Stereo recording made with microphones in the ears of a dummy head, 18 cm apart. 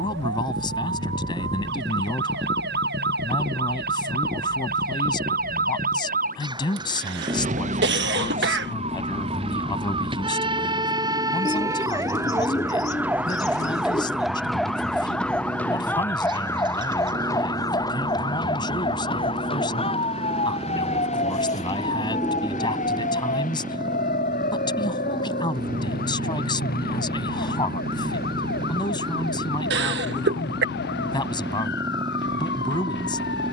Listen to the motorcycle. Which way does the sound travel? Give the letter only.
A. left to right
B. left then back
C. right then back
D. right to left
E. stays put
E.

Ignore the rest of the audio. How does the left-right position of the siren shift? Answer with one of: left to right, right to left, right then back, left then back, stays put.
right to left.